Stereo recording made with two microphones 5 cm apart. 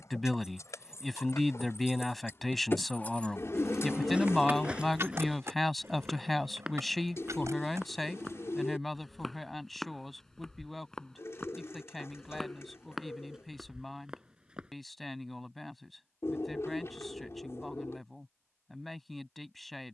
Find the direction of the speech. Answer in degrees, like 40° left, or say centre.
centre.